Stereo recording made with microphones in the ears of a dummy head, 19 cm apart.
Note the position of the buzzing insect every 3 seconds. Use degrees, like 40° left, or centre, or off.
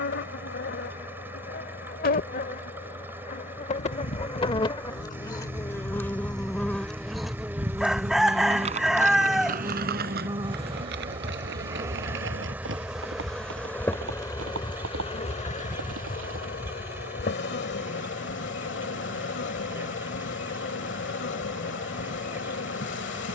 50° left, 30° left, centre, 20° right, 10° left, 50° left, 60° left, 60° left.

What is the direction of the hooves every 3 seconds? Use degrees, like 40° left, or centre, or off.
off, 50° left, 10° right, 50° right, 70° right, 80° right, off, off.